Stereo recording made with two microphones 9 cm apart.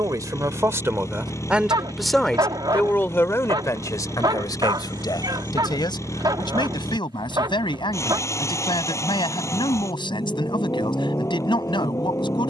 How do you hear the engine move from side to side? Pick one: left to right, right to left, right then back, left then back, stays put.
stays put.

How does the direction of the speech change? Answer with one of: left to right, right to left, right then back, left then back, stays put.
right to left.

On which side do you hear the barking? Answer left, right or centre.
right.